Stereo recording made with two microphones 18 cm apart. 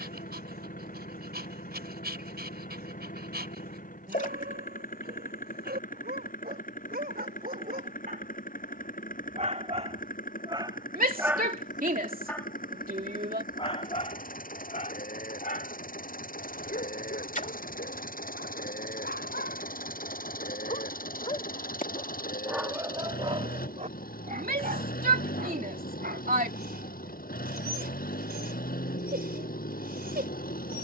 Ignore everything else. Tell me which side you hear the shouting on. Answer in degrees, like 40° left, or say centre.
50° right.